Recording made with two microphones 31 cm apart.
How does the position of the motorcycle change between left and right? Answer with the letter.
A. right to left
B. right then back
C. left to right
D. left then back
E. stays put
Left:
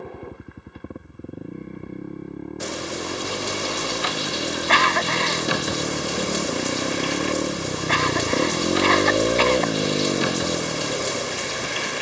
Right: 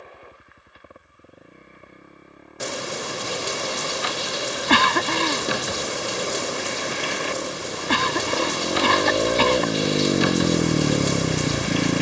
C.